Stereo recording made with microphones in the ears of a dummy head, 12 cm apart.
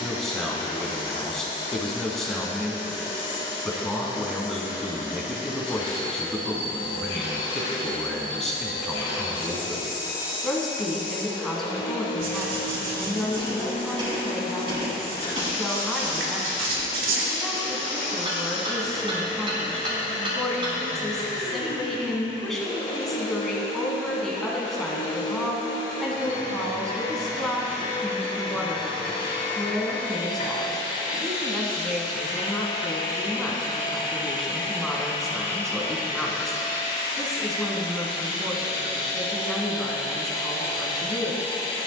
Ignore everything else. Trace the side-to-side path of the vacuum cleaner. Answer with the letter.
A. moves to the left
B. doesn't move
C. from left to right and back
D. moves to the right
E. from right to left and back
B.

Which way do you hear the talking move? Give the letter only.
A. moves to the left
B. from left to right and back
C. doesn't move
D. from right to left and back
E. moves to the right
C.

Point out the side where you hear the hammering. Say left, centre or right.
right.